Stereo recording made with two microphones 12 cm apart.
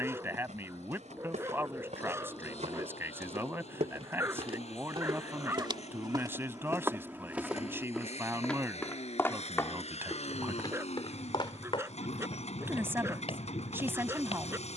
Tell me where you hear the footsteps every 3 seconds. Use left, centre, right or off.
right, right, centre, left, left.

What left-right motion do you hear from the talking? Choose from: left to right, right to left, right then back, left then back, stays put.
stays put.